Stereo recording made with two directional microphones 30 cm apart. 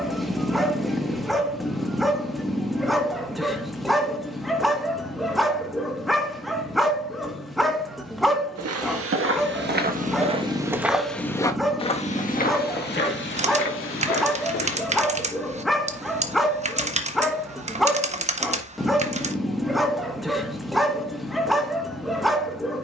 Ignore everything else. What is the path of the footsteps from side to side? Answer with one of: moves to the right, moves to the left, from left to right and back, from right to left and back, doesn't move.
moves to the left.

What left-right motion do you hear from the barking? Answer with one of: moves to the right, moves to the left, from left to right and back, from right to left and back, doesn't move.
doesn't move.